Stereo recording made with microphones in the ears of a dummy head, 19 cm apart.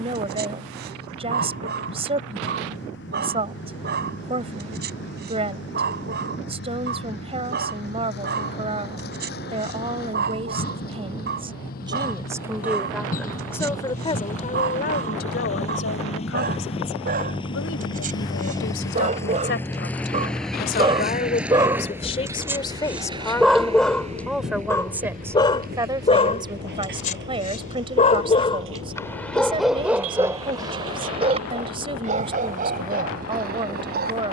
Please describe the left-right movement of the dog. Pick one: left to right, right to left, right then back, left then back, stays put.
left then back.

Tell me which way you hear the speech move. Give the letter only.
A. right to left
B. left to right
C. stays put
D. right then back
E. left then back
E.